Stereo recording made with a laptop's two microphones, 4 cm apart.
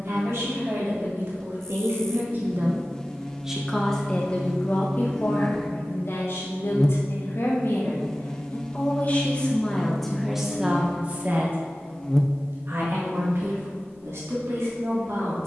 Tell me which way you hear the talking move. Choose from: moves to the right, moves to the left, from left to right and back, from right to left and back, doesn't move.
from right to left and back.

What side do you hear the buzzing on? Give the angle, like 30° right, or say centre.
10° left.